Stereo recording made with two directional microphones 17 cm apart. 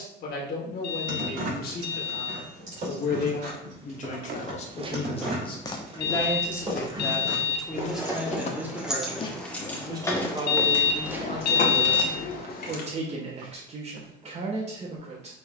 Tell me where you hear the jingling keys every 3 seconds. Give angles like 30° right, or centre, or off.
50° right, 40° right, 20° right, 20° left, 60° left.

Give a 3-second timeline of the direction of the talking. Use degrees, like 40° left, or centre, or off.
60° left, 40° left, centre, 30° right, 40° right.